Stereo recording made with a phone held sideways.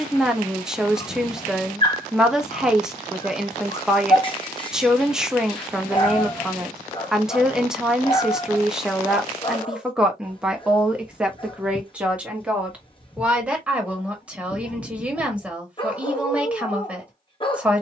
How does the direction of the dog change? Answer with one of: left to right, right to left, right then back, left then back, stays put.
stays put.